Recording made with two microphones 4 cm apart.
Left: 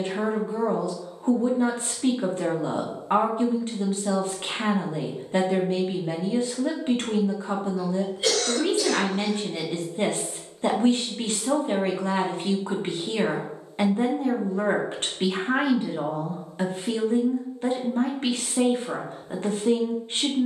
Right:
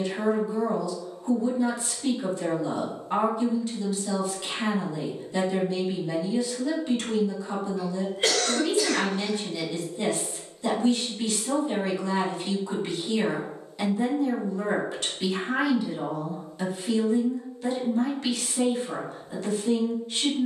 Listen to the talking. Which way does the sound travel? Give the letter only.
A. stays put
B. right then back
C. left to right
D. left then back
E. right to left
A.